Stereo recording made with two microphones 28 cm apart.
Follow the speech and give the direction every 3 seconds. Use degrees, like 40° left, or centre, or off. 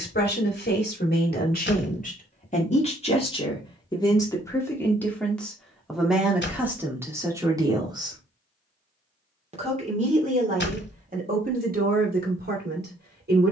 30° left, 10° left, 10° right, 30° right, 40° right.